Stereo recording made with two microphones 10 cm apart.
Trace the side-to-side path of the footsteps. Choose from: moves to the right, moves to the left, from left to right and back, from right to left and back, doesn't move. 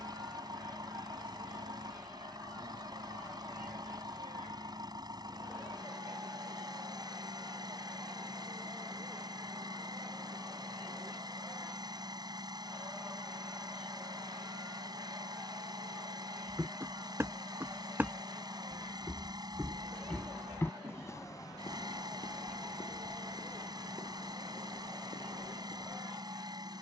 moves to the left.